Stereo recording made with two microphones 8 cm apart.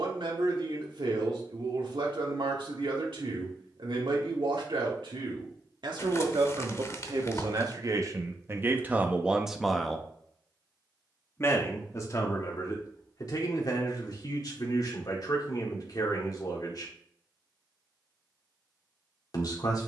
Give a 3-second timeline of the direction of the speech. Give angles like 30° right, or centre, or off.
80° right, 80° right, 50° right, 10° left, 50° left, 50° left, 50° left.